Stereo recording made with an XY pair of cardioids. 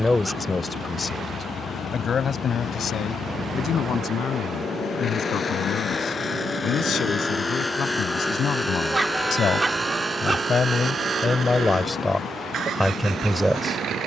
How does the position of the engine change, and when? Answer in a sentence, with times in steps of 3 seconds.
You can hear the engine on the left from 0 s, in the centre from 6 s and on the right from 9 s.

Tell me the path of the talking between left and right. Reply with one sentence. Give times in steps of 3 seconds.
You can hear the talking on the left from 0 s and in the centre from 12 s.